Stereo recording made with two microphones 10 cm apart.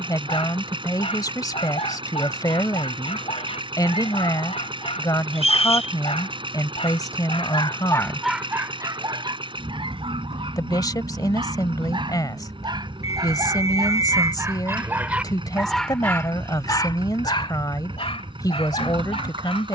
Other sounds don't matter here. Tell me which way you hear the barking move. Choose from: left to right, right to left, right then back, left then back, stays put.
right then back.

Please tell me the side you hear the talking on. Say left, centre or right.
left.